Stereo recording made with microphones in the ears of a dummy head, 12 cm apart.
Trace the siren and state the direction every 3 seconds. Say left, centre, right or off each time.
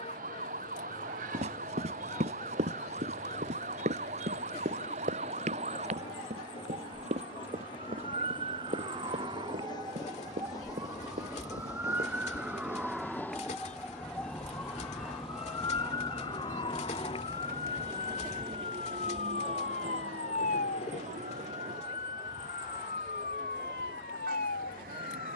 right, right, right, right, centre, left, left, left, left.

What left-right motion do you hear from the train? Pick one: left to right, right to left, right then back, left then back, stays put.
left to right.